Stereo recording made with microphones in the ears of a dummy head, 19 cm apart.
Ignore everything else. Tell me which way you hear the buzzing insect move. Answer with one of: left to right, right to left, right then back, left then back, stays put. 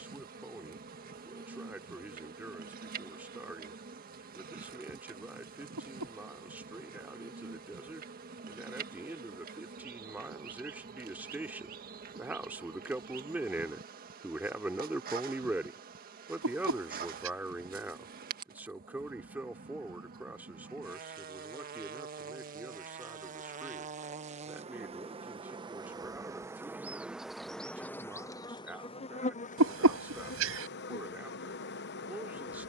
right to left.